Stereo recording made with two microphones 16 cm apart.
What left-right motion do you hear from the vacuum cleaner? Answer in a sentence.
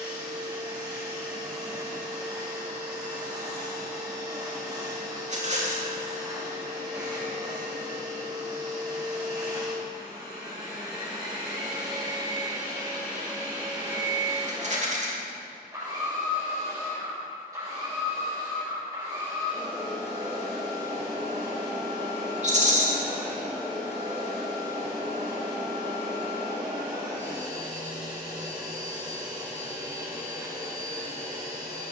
You can hear the vacuum cleaner stay in one place.